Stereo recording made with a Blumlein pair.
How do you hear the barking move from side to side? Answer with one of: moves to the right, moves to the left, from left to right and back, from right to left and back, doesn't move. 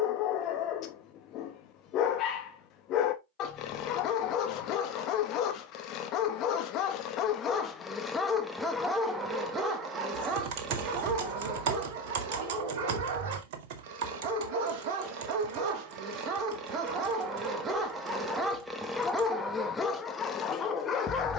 from left to right and back.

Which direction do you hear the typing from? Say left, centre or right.
right.